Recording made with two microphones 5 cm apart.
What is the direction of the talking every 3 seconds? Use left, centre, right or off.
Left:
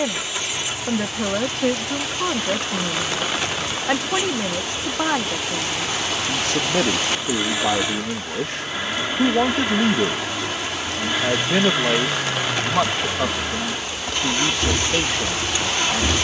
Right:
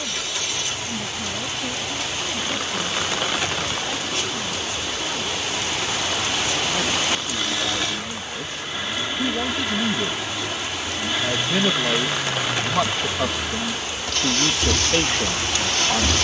left, left, left, left, centre, centre.